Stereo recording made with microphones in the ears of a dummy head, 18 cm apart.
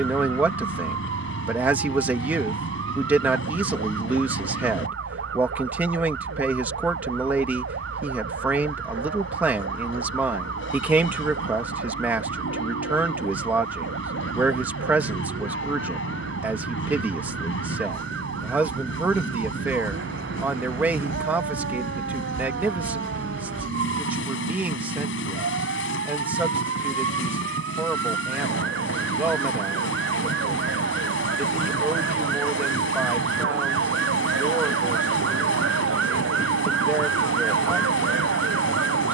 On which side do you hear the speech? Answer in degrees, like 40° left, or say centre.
10° right.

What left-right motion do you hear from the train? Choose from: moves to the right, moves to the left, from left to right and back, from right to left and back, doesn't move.
doesn't move.